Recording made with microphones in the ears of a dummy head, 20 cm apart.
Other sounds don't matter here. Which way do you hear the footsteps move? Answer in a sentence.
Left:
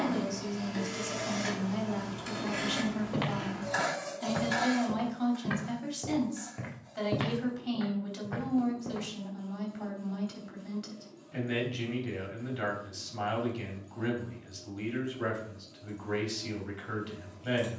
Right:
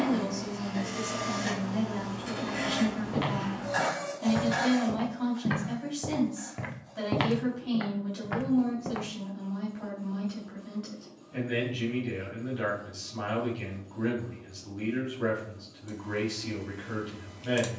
You can hear the footsteps move from left to right.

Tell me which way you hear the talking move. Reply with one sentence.
You can hear the talking stay put.